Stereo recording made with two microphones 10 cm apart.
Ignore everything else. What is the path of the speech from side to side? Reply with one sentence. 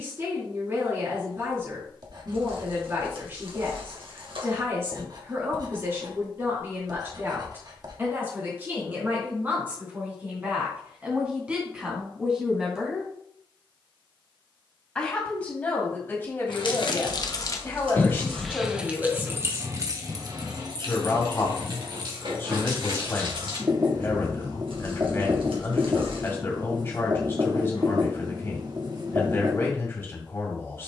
In this clip you hear the speech travel towards the left.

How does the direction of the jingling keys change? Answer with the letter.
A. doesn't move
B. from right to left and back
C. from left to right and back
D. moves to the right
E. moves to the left
D.